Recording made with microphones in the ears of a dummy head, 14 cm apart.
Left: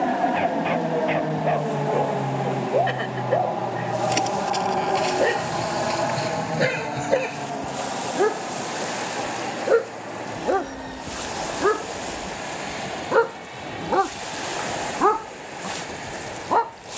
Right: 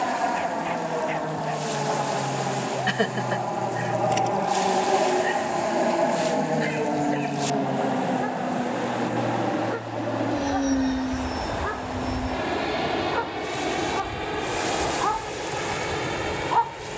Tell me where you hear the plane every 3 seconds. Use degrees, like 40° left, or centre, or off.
20° left, 10° right, 30° right, 50° right, 60° right, 60° right.